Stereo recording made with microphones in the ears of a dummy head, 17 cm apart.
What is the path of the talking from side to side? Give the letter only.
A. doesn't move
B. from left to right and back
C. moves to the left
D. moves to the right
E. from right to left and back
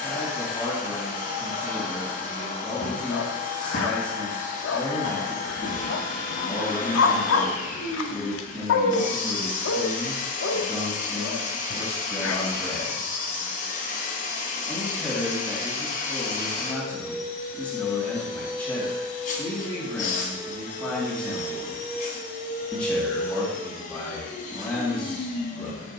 A.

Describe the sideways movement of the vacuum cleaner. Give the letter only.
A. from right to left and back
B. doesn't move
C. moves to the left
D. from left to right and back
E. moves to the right
B.